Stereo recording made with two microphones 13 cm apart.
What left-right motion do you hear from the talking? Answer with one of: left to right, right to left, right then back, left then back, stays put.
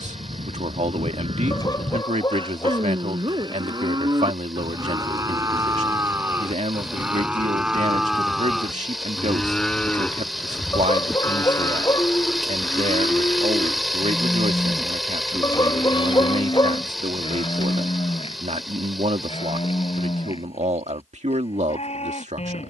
stays put.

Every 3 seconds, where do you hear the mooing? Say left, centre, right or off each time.
right, right, centre, centre, left, left, left, left.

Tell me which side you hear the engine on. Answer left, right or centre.
centre.